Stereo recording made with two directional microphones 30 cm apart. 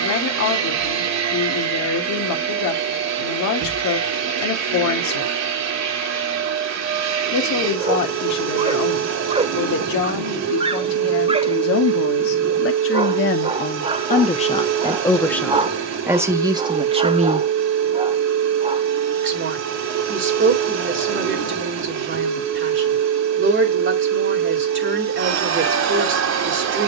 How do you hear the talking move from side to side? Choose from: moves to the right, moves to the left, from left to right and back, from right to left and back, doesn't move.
moves to the right.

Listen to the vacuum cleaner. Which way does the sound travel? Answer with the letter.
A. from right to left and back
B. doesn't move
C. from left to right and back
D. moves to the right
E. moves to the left
B.